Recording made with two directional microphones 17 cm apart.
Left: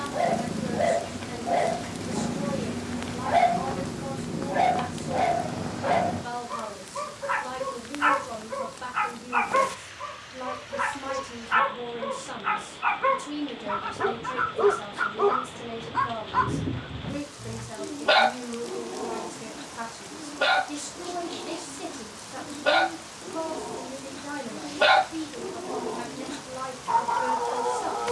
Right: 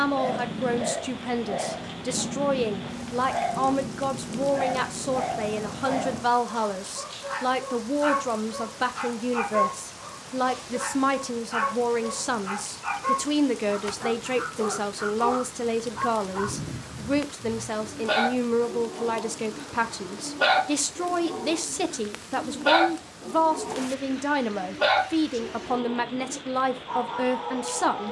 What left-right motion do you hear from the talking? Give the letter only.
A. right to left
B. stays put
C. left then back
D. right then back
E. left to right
B.